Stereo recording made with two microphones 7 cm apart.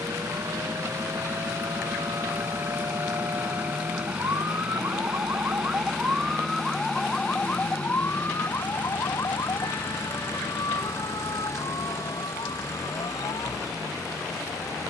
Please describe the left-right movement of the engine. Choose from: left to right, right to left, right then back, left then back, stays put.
right to left.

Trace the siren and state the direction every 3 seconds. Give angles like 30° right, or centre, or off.
70° right, 40° right, 20° left, 60° left, 70° left.